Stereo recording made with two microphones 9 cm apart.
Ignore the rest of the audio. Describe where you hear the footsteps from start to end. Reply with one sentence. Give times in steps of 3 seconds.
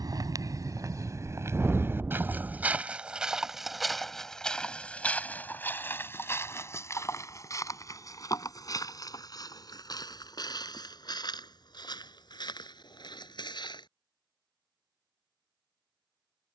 In this clip you hear the footsteps on the right from 0 s, in the centre from 3 s, on the left from 6 s and not at all from 15 s.